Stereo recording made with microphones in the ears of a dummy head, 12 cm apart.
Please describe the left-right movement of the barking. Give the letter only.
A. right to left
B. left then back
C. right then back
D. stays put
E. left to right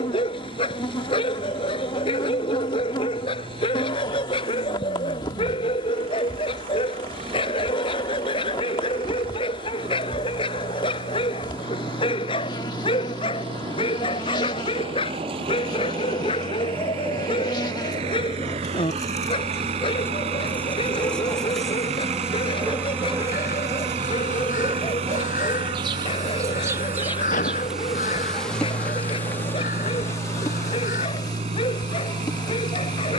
D.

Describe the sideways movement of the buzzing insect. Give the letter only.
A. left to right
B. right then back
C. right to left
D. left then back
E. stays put
B.